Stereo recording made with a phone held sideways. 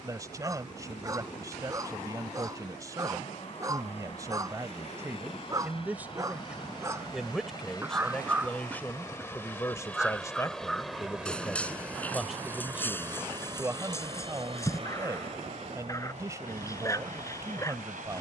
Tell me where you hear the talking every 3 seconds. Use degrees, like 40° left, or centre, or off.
20° right, 20° right, centre, 20° left, 10° right, 20° right.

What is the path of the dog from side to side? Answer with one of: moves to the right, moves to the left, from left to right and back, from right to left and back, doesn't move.
moves to the left.